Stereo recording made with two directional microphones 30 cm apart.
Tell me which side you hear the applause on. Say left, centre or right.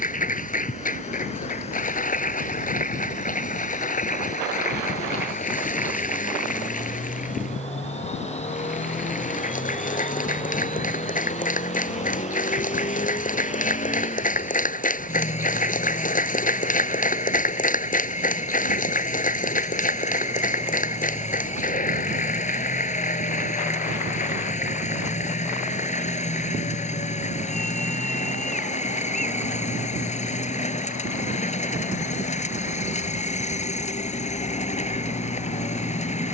left.